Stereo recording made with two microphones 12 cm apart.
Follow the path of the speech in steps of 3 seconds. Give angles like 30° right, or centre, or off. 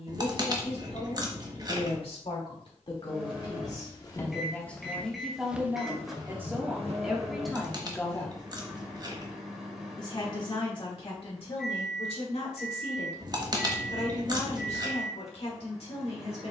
60° left, 10° left, centre, 50° left, 60° left, 60° left.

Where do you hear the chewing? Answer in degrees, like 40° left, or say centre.
30° right.